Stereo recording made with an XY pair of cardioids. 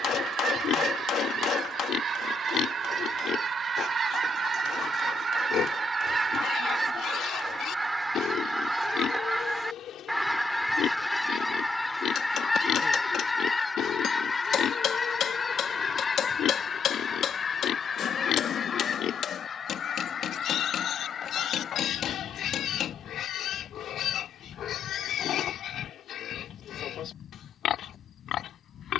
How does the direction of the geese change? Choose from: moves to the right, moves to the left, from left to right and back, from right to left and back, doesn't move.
moves to the left.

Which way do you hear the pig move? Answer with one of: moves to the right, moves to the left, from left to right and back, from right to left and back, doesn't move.
doesn't move.